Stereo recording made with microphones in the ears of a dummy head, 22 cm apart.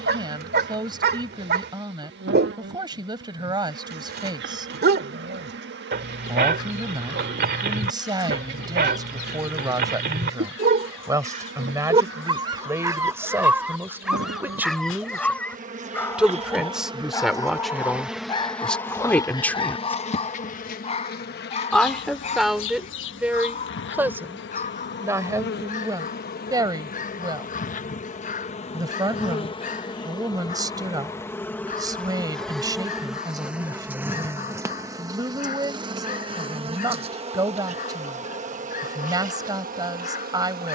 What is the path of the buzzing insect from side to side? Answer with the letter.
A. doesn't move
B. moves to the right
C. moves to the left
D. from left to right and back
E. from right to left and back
E.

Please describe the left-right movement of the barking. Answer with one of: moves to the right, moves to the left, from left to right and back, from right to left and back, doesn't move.
moves to the left.